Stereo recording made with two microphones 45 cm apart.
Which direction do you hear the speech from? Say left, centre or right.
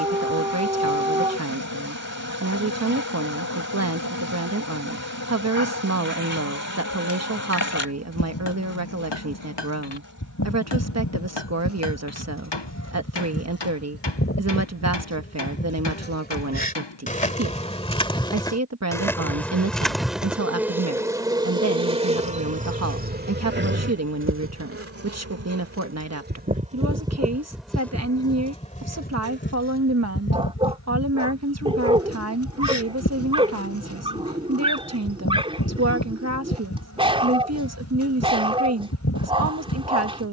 right.